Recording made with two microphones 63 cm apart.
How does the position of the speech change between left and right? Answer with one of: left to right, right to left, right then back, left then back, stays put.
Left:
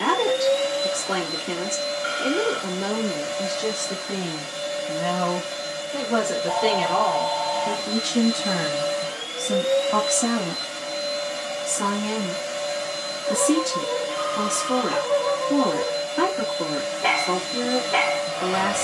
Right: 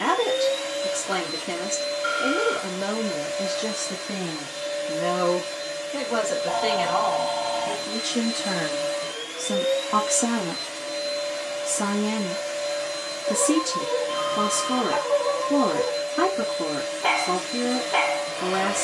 left then back.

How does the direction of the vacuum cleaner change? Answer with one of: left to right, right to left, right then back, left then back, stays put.
stays put.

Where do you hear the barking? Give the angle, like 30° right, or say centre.
50° left.